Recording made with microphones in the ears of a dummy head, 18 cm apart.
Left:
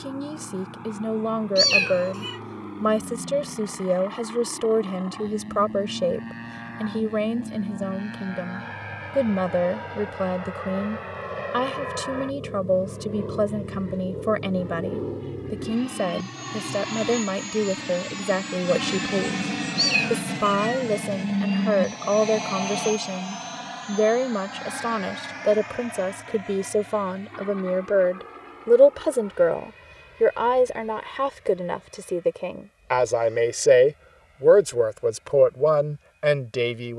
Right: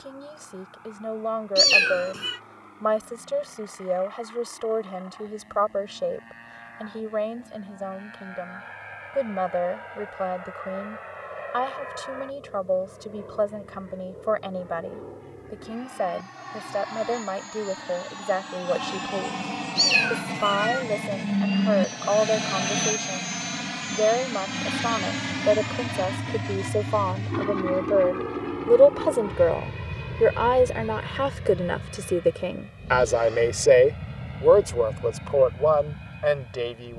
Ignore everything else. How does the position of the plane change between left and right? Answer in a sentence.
You can hear the plane travel towards the right.